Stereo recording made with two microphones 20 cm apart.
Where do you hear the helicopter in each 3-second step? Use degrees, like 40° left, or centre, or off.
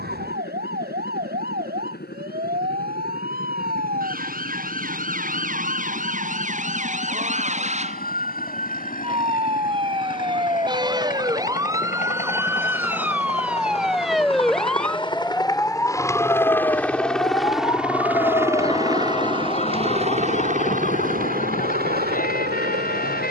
60° left, 60° left, 50° left, 50° left, 30° left, 10° left, 30° right, 50° right.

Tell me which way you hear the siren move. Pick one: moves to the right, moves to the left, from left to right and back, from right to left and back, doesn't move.
moves to the left.